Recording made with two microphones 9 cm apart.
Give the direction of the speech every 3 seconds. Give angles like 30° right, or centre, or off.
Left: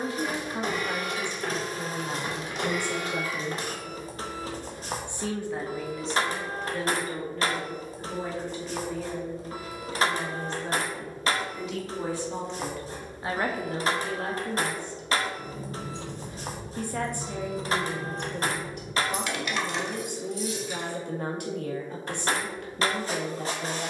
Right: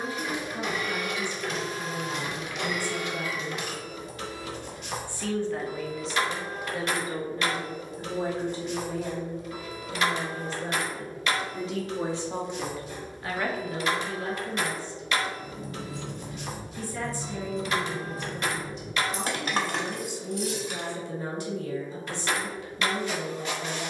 60° left, 30° left, 20° right, 40° right, 30° left, 60° left, 60° left, 60° left.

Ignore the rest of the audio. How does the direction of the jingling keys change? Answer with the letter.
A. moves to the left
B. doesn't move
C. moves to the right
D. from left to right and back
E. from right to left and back
C.